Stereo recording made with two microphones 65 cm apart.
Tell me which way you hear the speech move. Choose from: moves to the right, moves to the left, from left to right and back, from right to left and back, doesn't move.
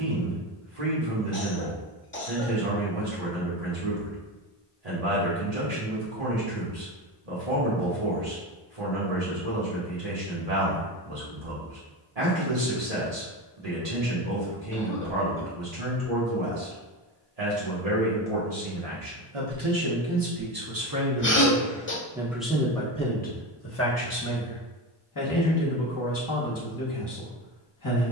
moves to the left.